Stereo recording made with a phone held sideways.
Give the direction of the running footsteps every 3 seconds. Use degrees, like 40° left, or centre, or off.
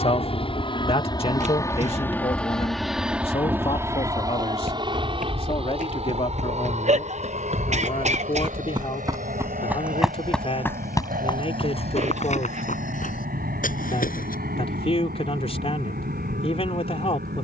off, 60° right, 40° right, 10° left, 60° left, off.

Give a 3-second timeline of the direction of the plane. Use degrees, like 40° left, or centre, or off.
20° left, 20° right, 50° right, 60° right, 70° right, 70° right.